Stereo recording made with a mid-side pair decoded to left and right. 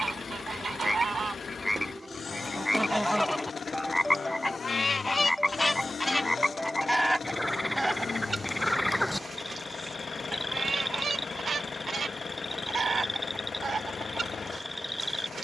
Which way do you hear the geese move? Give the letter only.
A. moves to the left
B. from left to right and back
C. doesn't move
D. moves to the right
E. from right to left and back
E.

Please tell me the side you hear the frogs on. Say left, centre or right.
centre.